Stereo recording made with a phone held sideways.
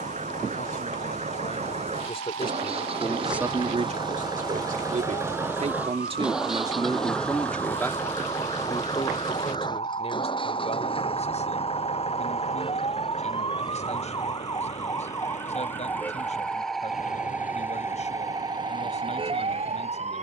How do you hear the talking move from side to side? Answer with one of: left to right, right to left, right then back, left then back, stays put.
right then back.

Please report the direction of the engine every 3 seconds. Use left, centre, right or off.
right, right, centre, left, left, left, left.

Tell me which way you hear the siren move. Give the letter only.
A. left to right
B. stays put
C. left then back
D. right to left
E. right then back
A.